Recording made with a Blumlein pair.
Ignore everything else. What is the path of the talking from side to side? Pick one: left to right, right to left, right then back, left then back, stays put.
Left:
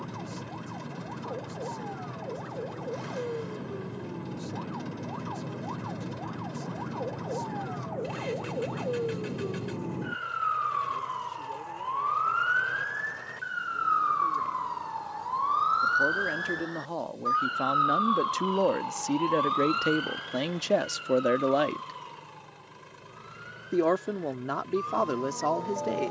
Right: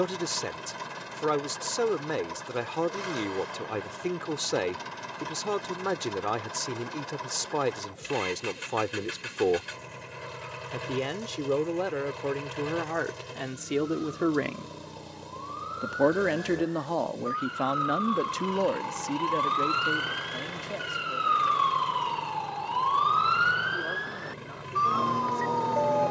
right to left.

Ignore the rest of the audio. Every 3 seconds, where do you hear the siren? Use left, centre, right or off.
left, left, left, left, left, left, centre, right, right.